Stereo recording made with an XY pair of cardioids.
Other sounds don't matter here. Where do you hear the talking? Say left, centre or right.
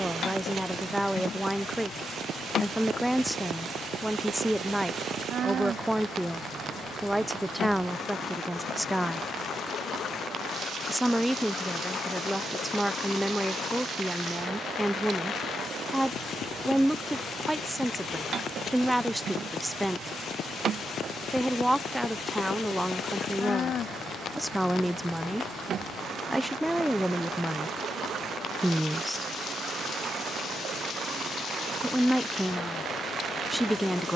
centre.